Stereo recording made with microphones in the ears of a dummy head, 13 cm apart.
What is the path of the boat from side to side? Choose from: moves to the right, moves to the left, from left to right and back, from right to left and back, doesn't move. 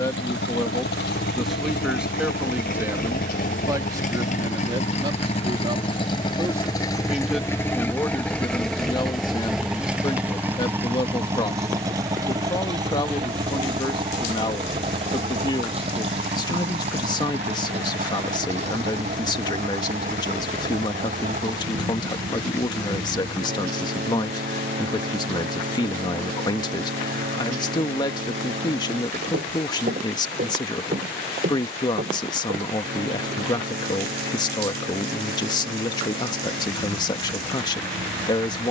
moves to the right.